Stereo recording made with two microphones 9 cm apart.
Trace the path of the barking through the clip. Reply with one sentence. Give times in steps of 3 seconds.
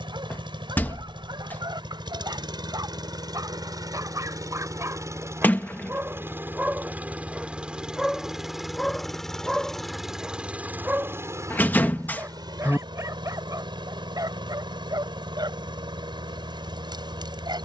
You can hear the barking on the right from 0 s, in the centre from 6 s and on the right from 12 s.